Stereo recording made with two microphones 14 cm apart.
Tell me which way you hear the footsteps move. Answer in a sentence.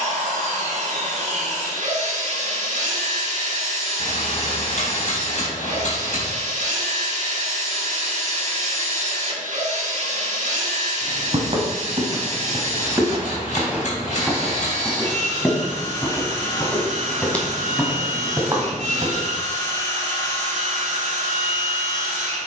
In this clip you hear the footsteps go left and come back.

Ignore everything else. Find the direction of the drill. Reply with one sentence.
In this clip you hear the drill on the right.